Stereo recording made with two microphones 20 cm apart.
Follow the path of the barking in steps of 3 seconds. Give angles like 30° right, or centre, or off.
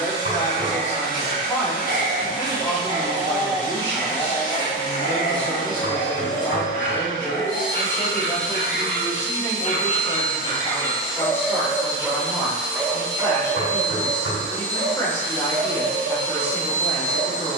40° right, 20° left, 50° left, 20° left, 20° right, 40° right.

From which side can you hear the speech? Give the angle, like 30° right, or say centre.
10° left.